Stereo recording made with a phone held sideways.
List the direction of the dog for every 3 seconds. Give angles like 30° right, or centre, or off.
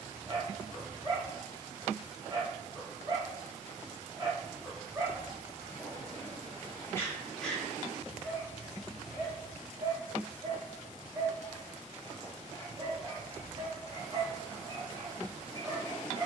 40° right, 20° right, 10° left, 30° right, 40° right, 40° right.